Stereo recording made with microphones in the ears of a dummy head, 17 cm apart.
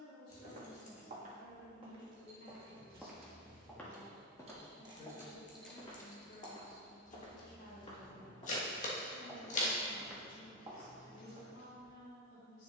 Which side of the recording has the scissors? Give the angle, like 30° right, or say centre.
40° left.